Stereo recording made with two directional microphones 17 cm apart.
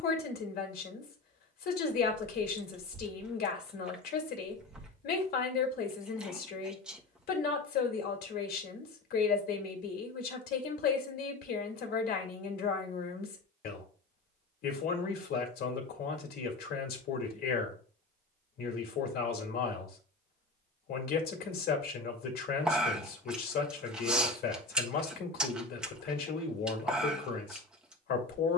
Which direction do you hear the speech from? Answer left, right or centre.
left.